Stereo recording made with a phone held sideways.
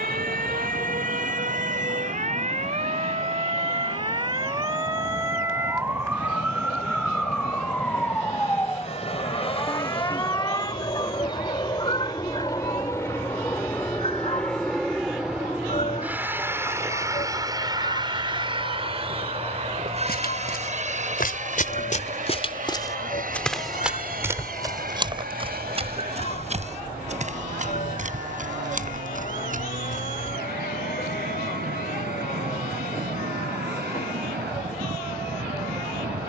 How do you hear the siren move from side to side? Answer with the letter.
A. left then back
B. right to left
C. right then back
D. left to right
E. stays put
B.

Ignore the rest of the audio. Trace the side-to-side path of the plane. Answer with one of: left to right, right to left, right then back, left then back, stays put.
left to right.